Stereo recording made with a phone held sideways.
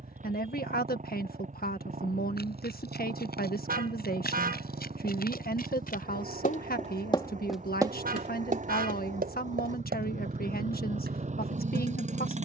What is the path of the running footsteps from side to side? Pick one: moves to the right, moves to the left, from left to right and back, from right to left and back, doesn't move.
moves to the right.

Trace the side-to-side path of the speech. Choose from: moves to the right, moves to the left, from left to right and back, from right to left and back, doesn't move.
doesn't move.